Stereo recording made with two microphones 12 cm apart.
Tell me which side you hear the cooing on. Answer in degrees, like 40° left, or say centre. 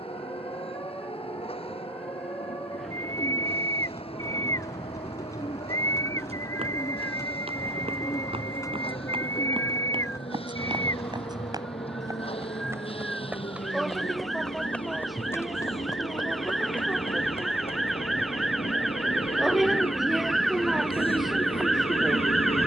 30° left.